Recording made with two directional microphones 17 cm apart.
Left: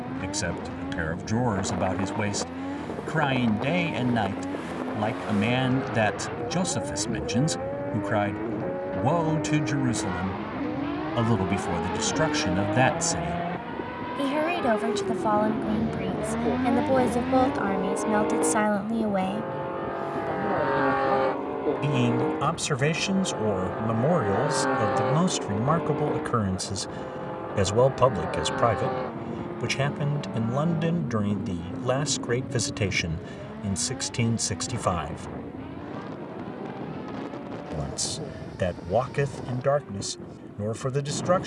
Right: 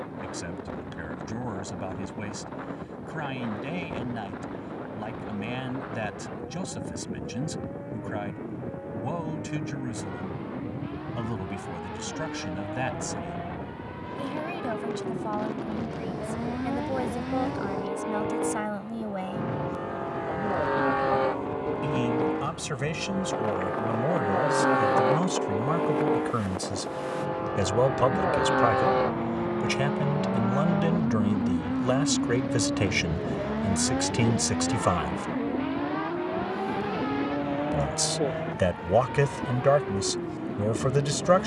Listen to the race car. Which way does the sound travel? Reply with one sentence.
In this clip you hear the race car move to the right.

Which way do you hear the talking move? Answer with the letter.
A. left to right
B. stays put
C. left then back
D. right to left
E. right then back
A.